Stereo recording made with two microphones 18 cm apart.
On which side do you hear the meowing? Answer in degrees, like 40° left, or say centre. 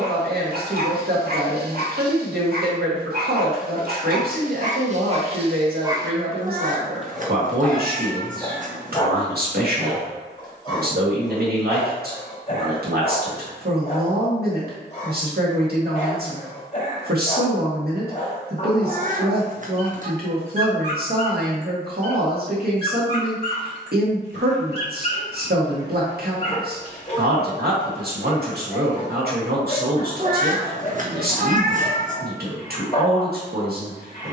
50° right.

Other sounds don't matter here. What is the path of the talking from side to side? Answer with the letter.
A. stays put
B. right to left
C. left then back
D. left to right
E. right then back
A.